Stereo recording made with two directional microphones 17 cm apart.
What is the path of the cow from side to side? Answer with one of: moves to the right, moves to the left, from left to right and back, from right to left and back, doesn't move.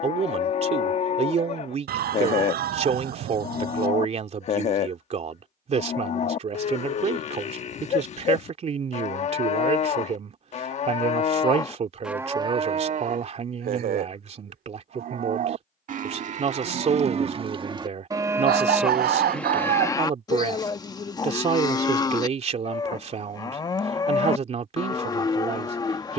from left to right and back.